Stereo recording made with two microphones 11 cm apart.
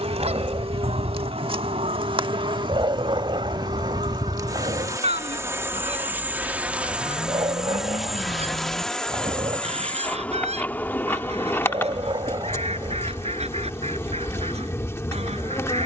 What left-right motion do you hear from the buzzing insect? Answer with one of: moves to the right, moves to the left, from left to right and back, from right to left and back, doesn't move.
moves to the left.